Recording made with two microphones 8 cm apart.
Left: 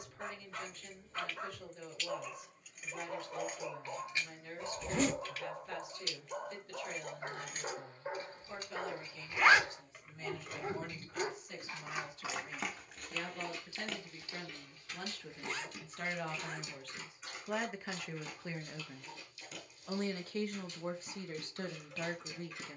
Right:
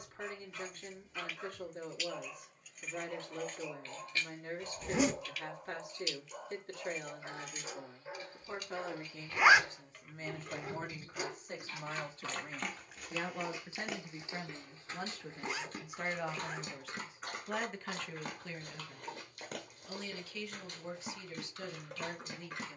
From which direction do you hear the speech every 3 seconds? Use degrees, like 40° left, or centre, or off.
50° right, 50° right, 50° right, 40° right, 30° right, 10° right, 30° left, 40° left.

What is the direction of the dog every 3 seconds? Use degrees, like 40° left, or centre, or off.
50° left, 50° left, 50° left, 30° left, 10° right, 50° right, 60° right, 60° right.